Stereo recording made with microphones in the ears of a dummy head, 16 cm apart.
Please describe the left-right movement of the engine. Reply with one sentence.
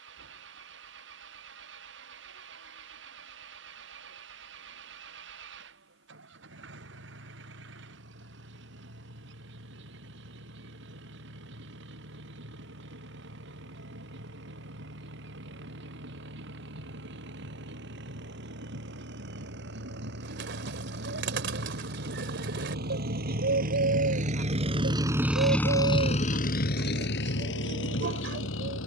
In this clip you hear the engine move to the left.